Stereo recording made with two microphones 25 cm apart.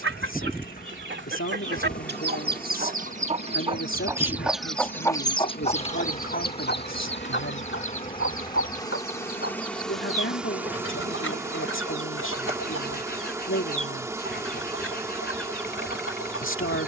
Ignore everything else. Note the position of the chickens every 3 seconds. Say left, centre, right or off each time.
right, centre, left, left, left, left.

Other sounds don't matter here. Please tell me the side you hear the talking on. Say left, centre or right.
left.